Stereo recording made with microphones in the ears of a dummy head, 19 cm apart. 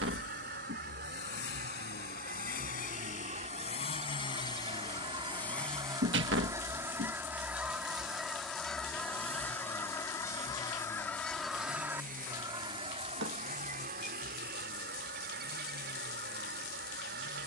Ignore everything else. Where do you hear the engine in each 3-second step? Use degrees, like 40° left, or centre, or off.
50° left, 20° left, 20° right, 40° right, 50° right, 50° right.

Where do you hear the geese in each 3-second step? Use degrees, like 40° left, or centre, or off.
40° right, 30° right, 10° right, 10° left, 40° right, 50° right.